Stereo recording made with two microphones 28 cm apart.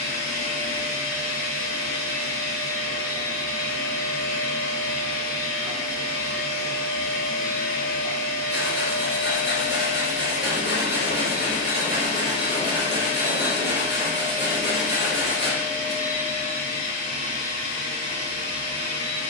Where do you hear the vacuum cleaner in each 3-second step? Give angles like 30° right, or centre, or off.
50° left, 50° left, 50° left, 40° left, 10° left, 10° right, 20° right.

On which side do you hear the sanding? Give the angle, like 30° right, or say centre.
40° left.